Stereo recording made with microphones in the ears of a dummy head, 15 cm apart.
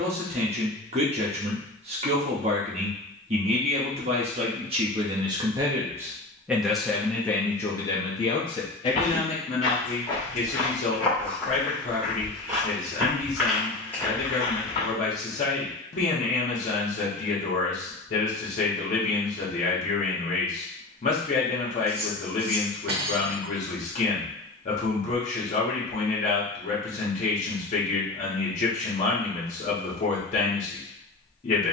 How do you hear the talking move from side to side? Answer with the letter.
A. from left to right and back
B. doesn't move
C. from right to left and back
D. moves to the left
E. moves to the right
D.